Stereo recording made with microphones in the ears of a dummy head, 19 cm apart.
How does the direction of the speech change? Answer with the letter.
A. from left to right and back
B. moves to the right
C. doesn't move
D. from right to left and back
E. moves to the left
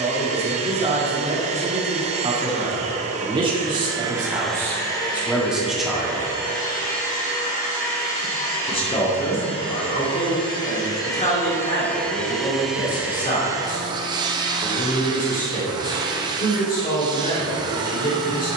E.